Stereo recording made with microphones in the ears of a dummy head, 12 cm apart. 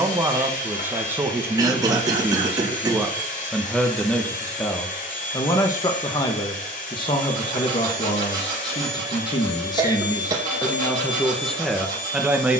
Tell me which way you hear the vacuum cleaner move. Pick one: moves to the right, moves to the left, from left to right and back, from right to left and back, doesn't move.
doesn't move.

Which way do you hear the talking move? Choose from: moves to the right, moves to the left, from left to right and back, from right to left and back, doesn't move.
from right to left and back.